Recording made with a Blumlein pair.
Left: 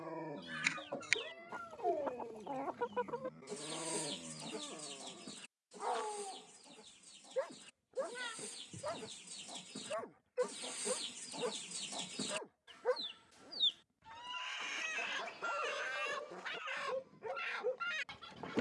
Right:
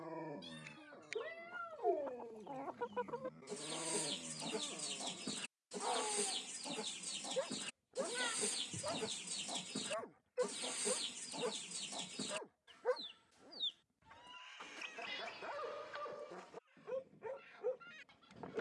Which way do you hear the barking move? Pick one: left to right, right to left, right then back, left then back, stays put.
stays put.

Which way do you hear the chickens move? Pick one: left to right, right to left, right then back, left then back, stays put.
right then back.